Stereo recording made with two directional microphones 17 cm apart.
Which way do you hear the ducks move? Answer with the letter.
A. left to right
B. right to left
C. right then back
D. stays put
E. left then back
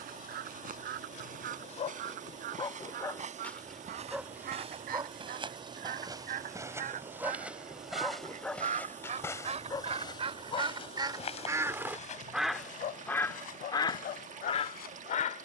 B.